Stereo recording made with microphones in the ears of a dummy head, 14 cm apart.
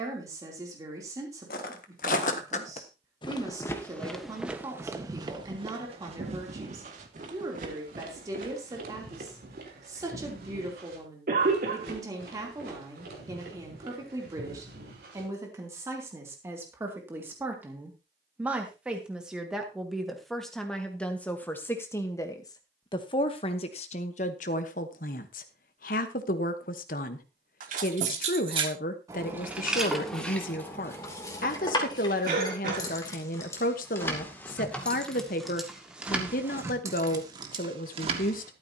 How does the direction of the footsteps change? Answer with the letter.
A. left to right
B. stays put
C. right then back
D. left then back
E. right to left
A.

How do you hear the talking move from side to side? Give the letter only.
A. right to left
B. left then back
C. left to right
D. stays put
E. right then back
A.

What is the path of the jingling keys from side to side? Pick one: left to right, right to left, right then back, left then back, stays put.
left then back.